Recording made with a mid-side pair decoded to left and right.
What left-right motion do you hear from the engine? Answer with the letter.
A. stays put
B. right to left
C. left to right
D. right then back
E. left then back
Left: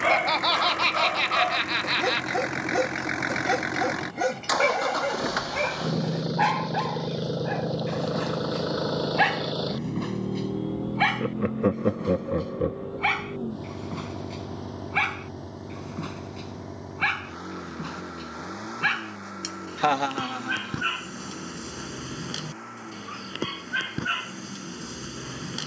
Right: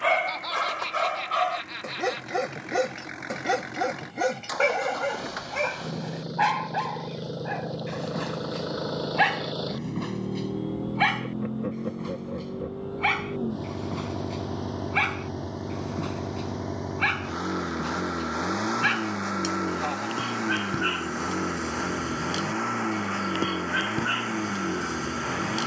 C.